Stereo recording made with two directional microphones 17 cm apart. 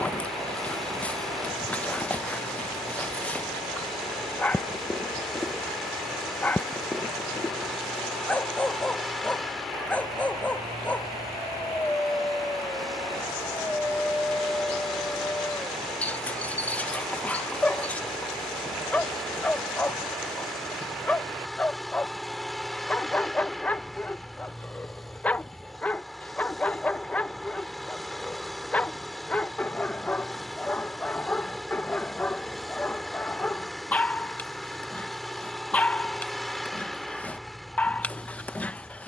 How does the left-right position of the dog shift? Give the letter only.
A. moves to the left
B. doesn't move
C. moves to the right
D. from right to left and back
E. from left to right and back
B.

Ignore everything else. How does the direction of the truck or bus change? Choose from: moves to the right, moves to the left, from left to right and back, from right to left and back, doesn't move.
doesn't move.